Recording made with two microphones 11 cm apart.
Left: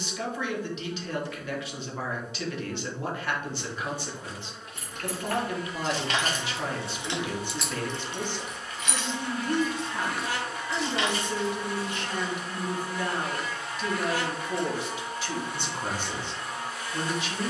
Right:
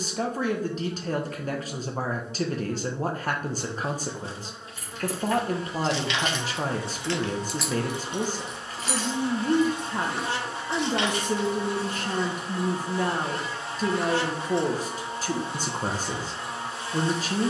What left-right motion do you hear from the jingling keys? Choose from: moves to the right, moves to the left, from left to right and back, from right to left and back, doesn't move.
moves to the right.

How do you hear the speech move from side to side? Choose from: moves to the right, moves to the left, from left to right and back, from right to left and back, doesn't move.
doesn't move.